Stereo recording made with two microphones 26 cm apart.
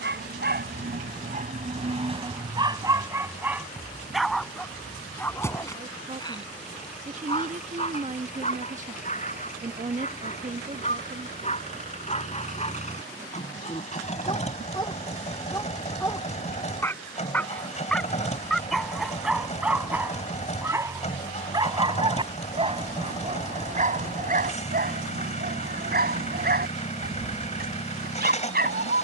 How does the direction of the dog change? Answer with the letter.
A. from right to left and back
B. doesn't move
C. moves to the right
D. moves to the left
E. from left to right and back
A.